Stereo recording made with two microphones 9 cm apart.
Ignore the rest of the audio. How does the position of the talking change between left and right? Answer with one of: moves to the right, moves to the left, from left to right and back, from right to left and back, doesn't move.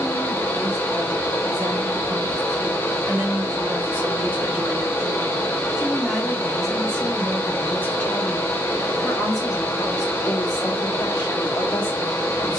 moves to the left.